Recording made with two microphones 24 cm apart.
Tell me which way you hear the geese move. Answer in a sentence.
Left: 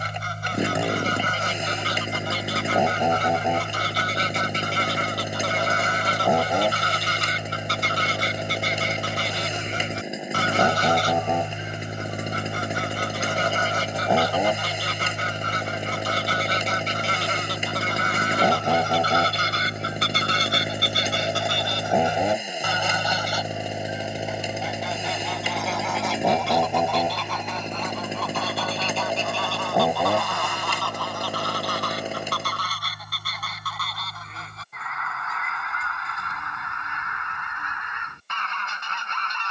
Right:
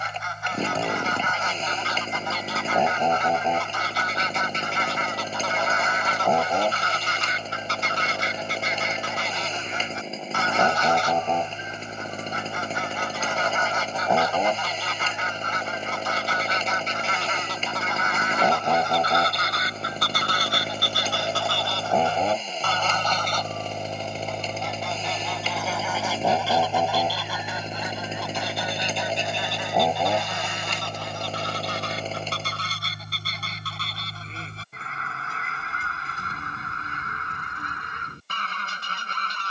In this clip you hear the geese move to the right.